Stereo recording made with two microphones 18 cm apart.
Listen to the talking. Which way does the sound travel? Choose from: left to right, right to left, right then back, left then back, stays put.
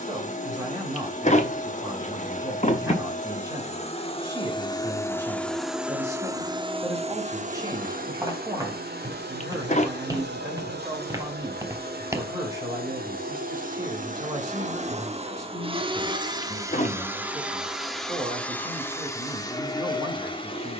stays put.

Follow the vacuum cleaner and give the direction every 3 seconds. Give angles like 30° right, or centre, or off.
40° left, 20° left, 40° right, 70° right, 50° right, 20° right, 20° left.